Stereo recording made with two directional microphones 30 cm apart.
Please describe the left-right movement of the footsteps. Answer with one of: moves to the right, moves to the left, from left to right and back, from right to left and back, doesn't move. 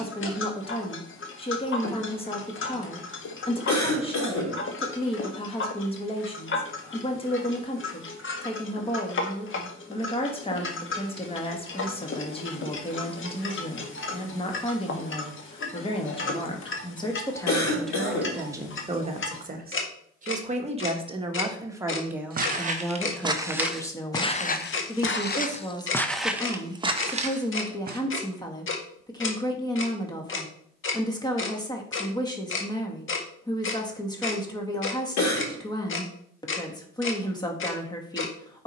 from right to left and back.